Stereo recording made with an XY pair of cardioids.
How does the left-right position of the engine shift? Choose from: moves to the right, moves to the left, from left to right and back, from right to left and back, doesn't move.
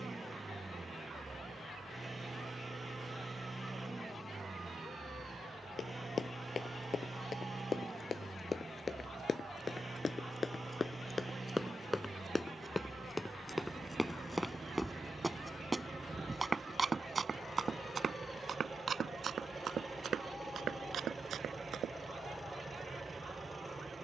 doesn't move.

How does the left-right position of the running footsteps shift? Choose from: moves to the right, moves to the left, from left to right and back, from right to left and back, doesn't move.
moves to the right.